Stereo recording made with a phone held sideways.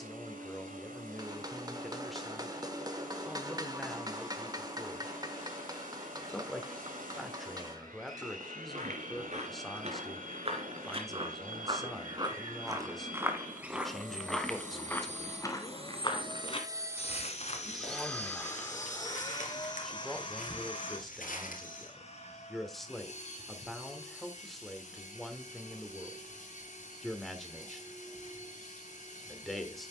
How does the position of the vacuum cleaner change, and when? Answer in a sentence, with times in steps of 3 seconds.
In this clip you hear the vacuum cleaner on the right from 0 s and on the left from 18 s.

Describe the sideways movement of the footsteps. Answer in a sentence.
In this clip you hear the footsteps move to the left.